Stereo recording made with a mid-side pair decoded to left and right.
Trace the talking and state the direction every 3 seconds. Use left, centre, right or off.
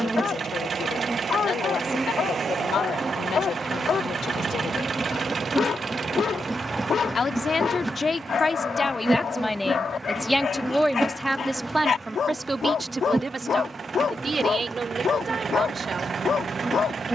left, left, left, centre, right, right.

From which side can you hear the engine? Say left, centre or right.
right.